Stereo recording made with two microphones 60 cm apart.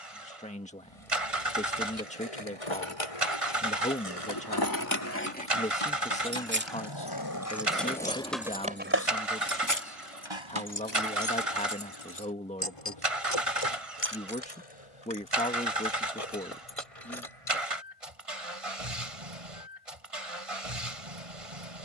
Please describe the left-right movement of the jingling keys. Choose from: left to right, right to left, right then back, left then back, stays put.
right then back.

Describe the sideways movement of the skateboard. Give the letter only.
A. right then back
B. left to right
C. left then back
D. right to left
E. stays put
B.